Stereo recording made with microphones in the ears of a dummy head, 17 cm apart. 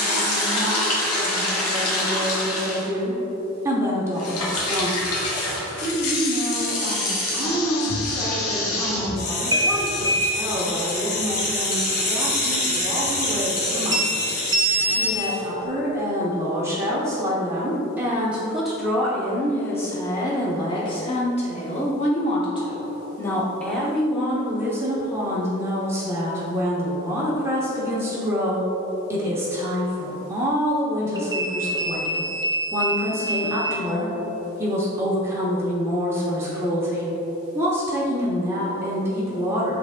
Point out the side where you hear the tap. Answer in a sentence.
In this clip you hear the tap on the left.